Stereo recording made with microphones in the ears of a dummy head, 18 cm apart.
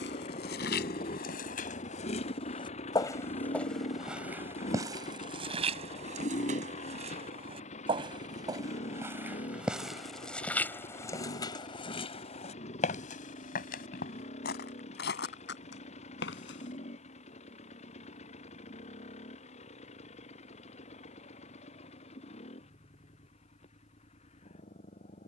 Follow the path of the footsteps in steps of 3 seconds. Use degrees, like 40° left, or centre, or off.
50° left, 10° right, 30° right, 10° left, 40° left, 60° left, off, off, off.